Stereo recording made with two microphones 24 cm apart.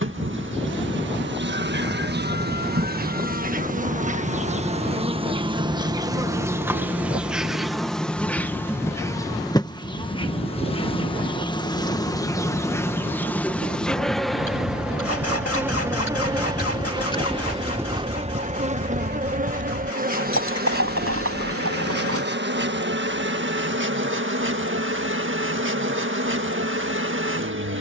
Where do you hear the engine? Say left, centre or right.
left.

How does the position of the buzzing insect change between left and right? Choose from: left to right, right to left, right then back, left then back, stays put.
left then back.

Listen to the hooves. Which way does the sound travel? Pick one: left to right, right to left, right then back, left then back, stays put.
left to right.